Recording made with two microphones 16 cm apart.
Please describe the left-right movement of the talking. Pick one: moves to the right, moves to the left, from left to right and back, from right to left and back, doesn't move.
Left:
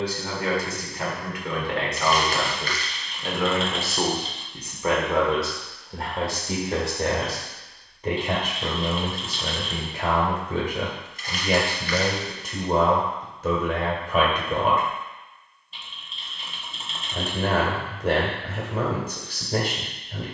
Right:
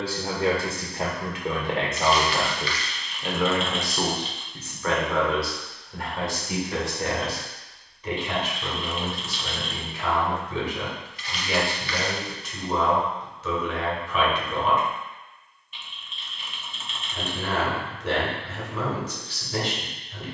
moves to the left.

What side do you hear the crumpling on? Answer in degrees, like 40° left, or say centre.
40° left.